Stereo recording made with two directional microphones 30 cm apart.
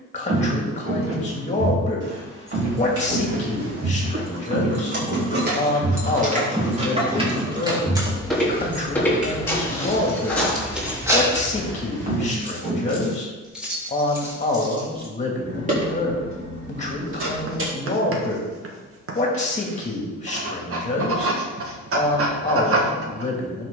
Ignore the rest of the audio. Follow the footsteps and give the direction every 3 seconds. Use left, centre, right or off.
right, right, centre, centre, right, off, off, off.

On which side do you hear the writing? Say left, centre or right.
right.